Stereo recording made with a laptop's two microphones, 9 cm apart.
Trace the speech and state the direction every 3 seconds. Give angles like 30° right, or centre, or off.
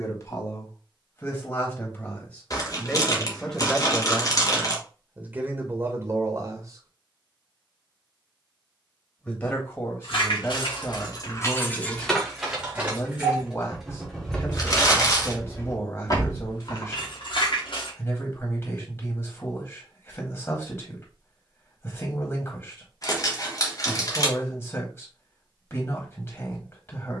30° left, 10° right, 40° right, 30° left, 30° left, 30° left, 30° left, 30° left, 30° left.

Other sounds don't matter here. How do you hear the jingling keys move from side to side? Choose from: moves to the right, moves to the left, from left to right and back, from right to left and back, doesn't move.
from left to right and back.